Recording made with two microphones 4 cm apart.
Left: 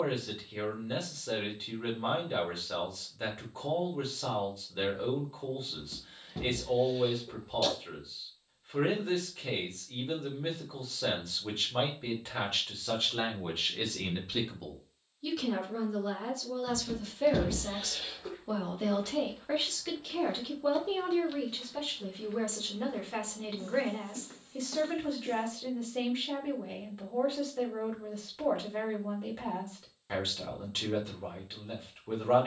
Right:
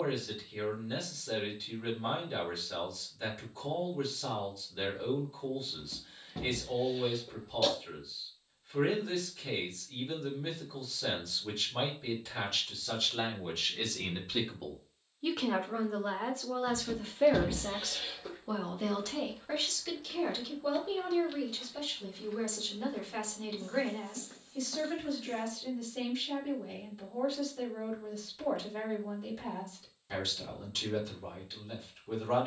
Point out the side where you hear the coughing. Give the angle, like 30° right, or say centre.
10° right.